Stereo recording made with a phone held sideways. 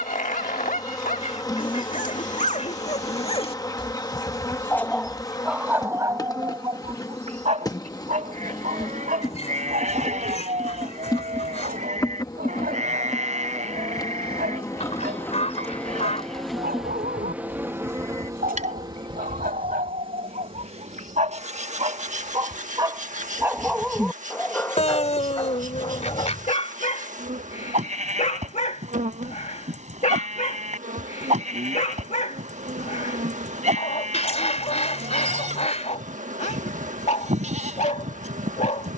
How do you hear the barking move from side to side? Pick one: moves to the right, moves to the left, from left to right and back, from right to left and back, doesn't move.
from left to right and back.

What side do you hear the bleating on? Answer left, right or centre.
right.